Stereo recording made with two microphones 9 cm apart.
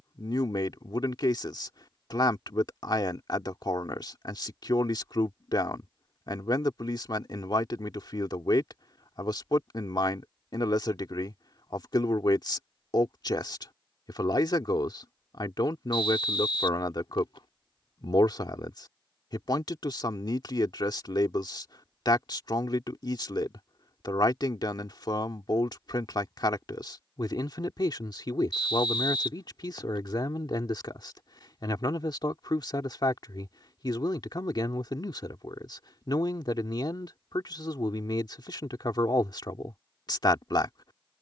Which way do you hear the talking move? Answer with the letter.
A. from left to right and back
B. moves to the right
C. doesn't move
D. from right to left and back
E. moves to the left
C.